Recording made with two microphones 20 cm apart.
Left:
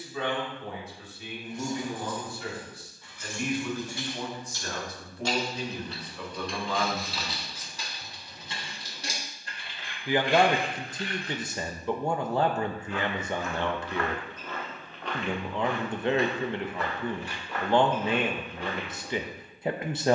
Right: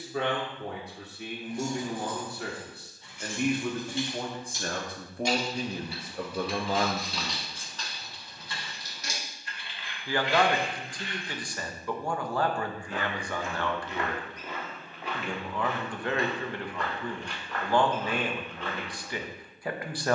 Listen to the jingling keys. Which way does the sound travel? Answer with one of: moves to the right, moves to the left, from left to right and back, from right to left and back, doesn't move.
moves to the left.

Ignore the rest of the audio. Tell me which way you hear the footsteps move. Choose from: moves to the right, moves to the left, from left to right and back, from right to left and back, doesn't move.
moves to the left.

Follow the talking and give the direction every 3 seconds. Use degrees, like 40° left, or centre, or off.
60° right, 50° right, 40° right, 20° left, 20° left, 20° left, 20° left.